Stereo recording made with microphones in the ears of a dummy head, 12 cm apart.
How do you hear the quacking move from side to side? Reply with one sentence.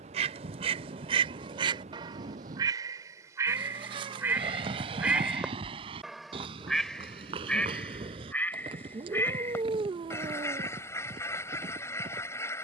You can hear the quacking go from the right side to the left.